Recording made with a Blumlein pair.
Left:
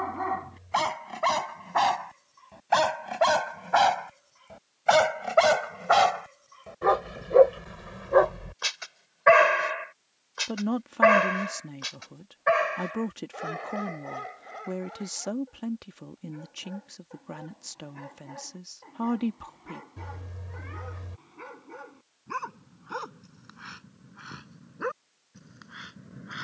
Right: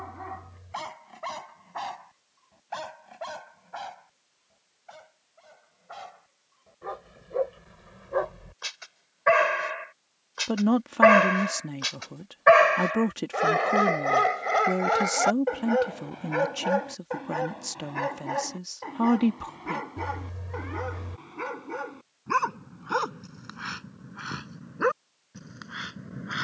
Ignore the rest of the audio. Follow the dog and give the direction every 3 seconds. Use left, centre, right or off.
left, left, left, centre, right, right, right, right, right.